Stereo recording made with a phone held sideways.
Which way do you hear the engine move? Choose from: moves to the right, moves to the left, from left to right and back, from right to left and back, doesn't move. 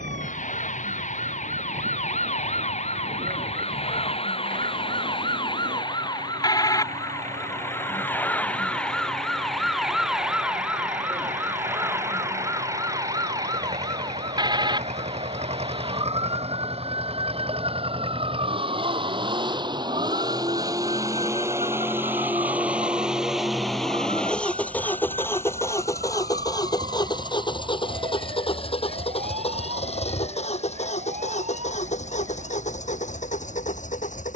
moves to the left.